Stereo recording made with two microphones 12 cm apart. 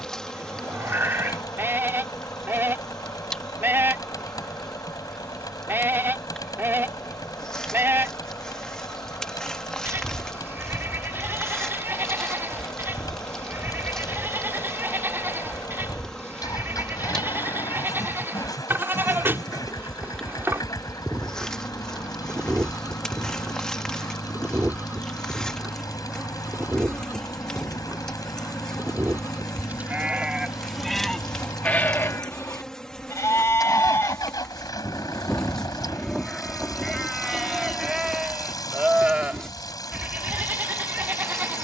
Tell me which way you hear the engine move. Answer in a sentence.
In this clip you hear the engine stay put.